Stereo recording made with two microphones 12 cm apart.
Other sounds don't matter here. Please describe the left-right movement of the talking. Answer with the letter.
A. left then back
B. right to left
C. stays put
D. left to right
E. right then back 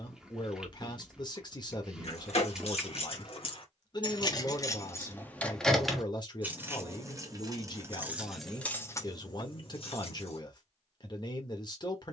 C.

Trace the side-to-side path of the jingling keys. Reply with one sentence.
You can hear the jingling keys go right and come back.